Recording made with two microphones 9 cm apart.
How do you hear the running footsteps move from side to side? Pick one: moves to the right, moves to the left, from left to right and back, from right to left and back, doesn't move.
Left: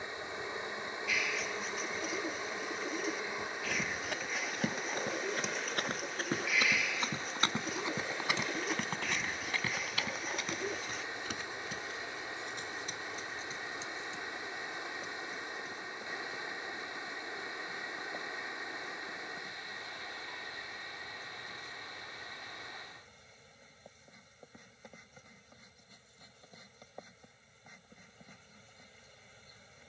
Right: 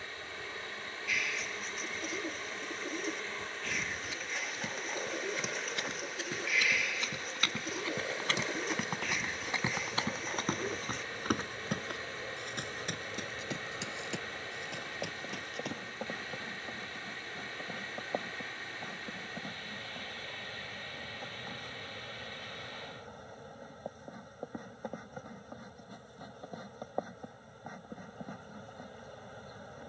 moves to the right.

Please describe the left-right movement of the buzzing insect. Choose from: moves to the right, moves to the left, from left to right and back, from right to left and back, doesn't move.
moves to the right.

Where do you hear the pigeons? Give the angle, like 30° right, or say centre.
centre.